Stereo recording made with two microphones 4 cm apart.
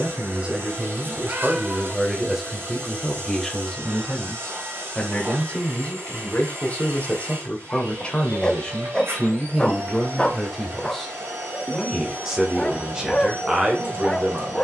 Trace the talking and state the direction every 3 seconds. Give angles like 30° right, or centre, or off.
20° right, 20° left, 30° left, 10° left, 20° right.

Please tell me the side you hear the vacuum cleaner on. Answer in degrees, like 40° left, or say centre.
80° right.